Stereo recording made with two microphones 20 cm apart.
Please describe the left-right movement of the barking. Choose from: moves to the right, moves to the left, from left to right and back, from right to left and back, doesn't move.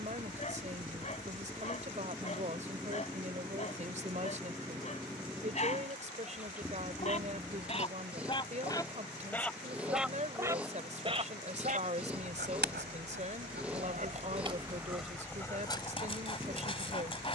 from left to right and back.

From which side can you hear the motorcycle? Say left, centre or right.
centre.